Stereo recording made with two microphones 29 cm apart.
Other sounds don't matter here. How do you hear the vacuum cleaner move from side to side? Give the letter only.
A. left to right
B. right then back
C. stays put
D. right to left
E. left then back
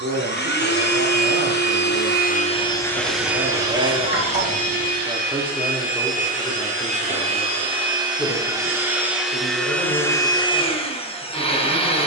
B.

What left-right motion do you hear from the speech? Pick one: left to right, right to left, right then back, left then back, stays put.
right to left.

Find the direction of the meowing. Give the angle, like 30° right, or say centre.
30° right.